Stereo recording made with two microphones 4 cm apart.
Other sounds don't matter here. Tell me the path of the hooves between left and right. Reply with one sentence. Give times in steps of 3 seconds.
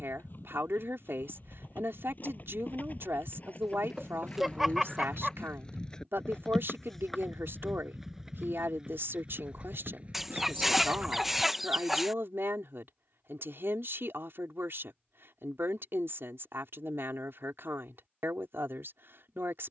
You can hear the hooves on the left from 0 s, in the centre from 6 s, on the right from 9 s and not at all from 12 s.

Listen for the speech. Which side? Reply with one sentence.
In this clip you hear the speech on the right.